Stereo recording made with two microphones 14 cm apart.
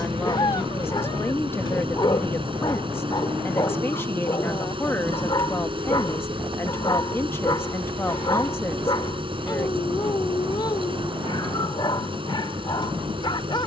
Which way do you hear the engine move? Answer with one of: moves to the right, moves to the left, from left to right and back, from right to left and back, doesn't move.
doesn't move.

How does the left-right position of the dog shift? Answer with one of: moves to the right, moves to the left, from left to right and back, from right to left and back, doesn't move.
doesn't move.